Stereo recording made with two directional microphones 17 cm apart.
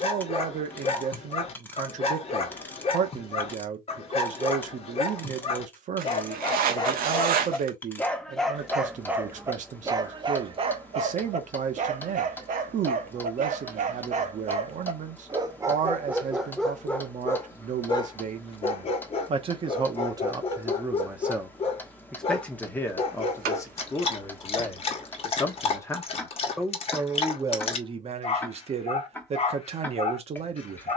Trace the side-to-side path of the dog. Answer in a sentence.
In this clip you hear the dog go right and come back.